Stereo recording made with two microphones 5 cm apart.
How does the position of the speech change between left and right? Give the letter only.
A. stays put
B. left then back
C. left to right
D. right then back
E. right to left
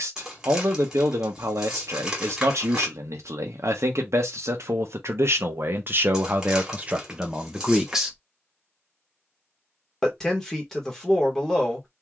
E.